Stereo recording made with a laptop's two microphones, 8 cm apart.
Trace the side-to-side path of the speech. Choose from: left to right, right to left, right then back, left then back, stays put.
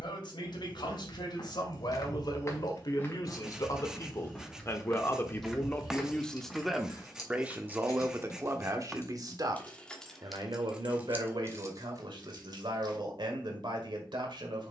left to right.